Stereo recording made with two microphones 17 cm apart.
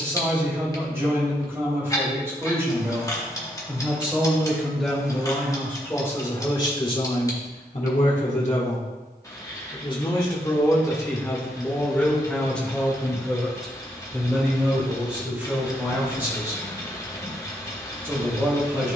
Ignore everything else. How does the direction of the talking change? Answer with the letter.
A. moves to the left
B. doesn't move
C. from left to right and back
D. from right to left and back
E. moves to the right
D.